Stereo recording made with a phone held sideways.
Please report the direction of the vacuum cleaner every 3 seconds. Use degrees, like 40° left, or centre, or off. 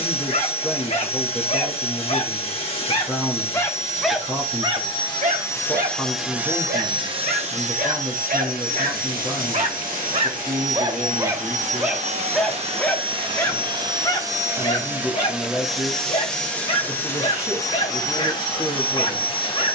40° left, 30° left, 40° right, 60° right, 30° right, 10° left, 30° left.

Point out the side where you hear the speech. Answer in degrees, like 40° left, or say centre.
20° right.